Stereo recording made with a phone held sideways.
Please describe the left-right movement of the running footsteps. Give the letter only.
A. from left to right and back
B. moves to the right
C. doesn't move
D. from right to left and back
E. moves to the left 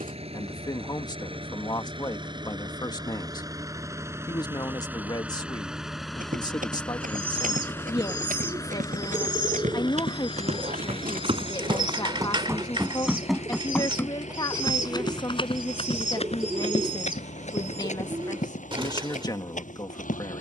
E.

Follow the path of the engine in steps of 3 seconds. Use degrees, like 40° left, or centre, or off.
40° right, 20° right, 10° left, 40° left, 50° left, 60° left, 70° left.